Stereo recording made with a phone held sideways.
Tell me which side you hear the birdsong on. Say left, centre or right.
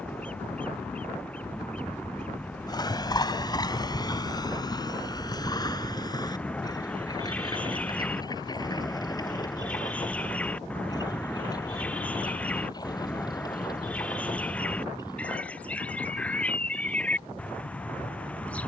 centre.